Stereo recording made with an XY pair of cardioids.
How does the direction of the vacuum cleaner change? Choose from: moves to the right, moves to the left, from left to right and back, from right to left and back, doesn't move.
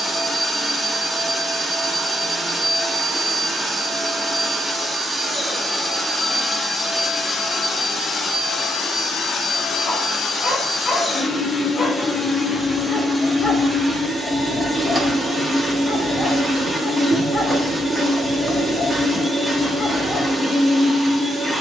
from right to left and back.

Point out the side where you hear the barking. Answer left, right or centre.
left.